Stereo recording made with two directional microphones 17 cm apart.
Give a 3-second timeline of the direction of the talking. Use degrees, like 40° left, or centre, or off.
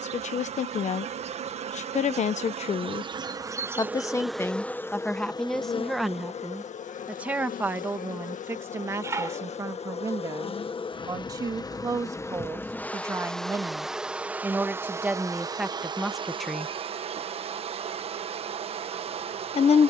40° left, 10° left, 10° right, 20° right, 20° right, centre, 40° left.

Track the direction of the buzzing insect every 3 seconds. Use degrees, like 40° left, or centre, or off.
40° right, centre, 50° left, 30° left, centre, 30° right, 40° right.